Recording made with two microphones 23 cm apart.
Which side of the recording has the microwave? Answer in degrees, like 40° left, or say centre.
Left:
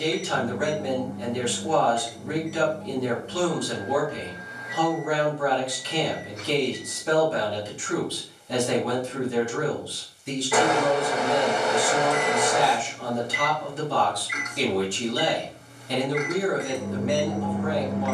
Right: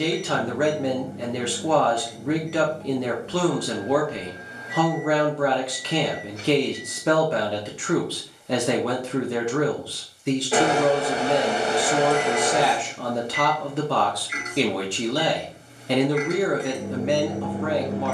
30° right.